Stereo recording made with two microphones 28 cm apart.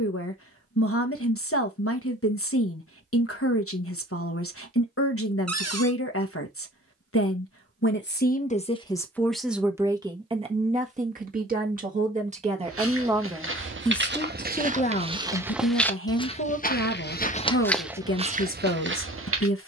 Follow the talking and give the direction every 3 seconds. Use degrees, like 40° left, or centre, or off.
60° left, 60° left, 40° left, 20° right, centre, 50° left, 50° left.